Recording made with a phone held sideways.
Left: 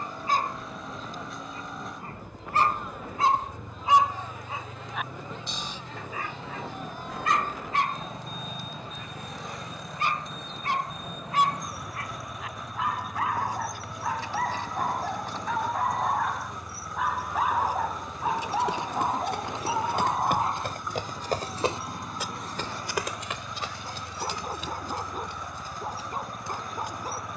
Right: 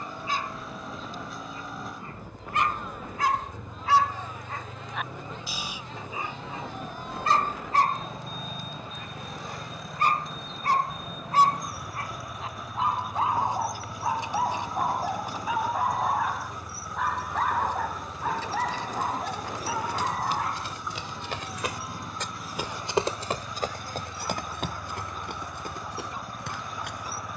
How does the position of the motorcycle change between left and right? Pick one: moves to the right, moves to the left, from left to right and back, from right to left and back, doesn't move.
doesn't move.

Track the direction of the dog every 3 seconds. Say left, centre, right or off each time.
left, centre, right, right, right, centre, left, left, left.